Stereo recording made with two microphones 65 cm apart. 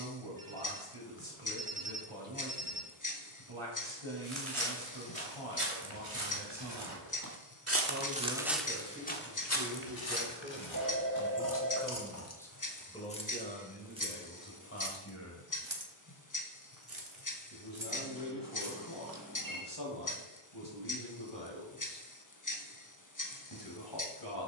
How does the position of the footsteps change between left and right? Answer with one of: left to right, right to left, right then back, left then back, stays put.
right to left.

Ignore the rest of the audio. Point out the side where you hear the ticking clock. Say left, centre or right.
left.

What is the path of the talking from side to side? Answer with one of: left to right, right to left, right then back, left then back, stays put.
right to left.